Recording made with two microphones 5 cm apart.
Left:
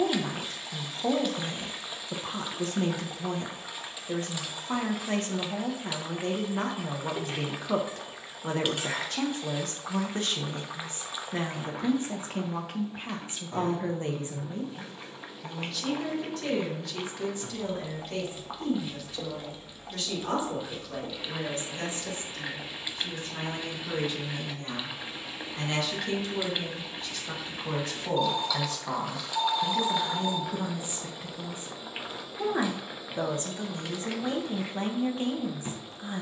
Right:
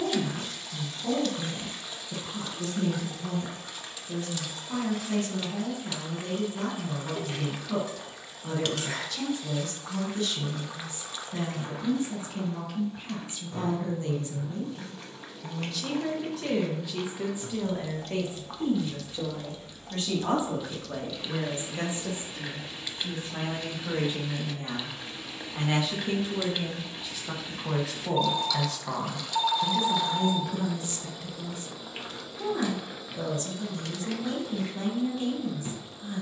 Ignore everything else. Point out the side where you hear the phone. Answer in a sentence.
You can hear the phone on the right.